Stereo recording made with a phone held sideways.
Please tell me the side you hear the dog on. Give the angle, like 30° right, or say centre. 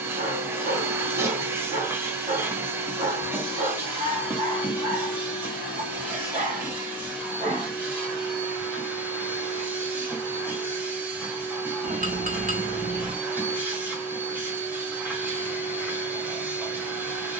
50° right.